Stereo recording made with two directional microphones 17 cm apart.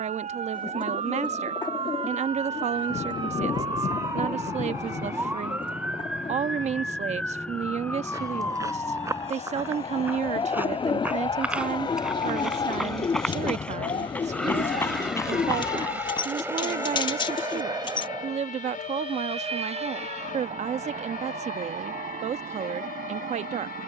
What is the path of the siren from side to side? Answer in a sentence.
In this clip you hear the siren travel towards the left.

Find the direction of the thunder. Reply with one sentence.
In this clip you hear the thunder on the left.